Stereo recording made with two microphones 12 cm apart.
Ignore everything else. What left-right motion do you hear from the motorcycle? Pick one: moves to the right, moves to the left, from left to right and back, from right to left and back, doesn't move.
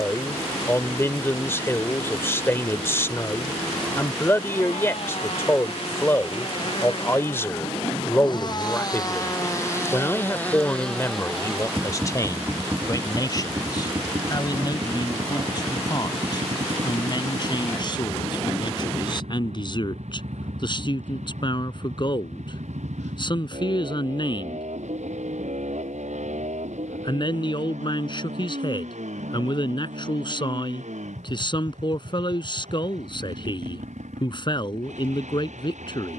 moves to the right.